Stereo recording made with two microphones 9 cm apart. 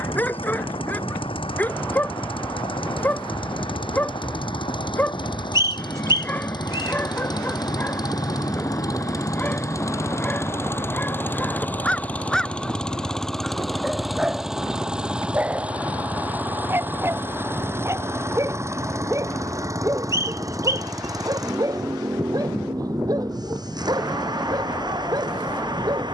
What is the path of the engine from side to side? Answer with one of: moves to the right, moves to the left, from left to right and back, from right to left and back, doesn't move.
moves to the right.